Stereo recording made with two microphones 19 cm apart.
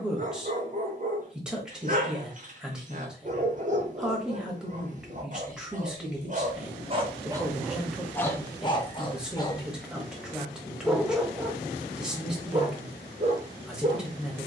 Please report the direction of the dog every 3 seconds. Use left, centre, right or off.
right, right, centre, centre, right.